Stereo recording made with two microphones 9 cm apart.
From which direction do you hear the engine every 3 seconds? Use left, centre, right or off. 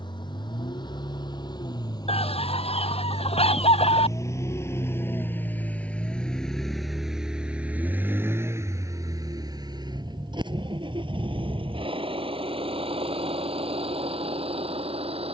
left, left, centre, right, right.